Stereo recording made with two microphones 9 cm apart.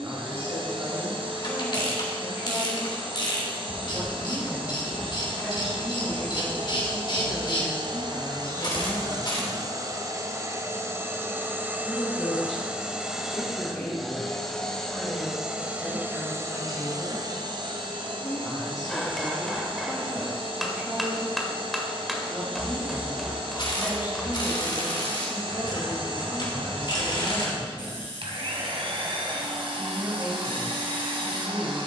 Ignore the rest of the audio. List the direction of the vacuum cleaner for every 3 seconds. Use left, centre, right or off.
right, right, right, right, centre, right, right, right, right, right, right.